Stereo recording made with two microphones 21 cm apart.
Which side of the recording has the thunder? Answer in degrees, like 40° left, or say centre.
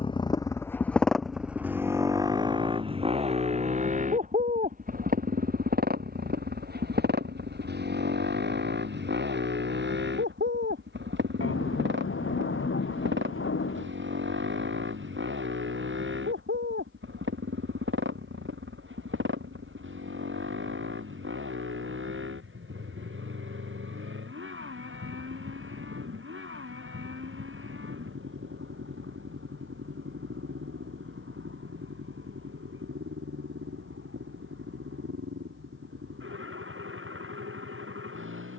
80° left.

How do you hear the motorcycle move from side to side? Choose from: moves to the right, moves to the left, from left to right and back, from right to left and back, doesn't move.
moves to the right.